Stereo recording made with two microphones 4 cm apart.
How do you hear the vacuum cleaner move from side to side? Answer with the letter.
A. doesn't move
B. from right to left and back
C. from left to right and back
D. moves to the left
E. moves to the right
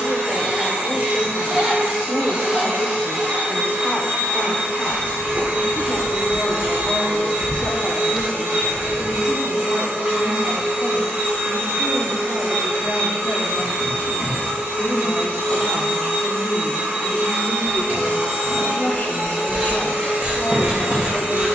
A.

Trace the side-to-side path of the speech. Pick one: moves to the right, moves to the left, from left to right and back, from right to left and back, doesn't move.
from left to right and back.